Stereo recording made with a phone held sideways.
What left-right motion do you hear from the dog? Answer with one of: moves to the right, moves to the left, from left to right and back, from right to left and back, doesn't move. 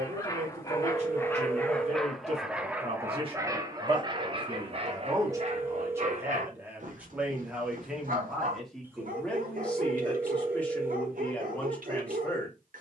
moves to the right.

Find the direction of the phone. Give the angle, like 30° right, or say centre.
10° right.